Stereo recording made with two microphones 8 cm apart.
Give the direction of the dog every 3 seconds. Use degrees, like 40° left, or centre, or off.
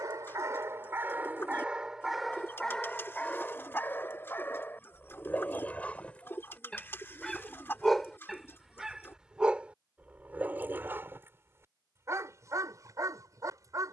20° right, 20° left, centre, 20° right, 40° right.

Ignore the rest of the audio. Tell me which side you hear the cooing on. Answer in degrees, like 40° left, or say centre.
30° left.